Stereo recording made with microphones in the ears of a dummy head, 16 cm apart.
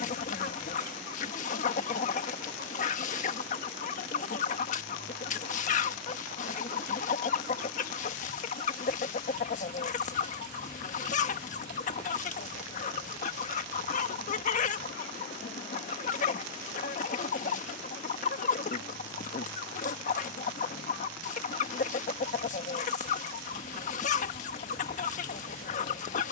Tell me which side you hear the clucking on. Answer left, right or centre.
left.